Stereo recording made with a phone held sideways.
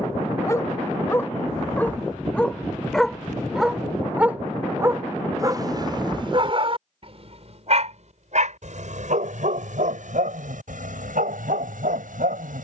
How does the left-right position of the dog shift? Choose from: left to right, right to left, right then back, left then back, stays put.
left to right.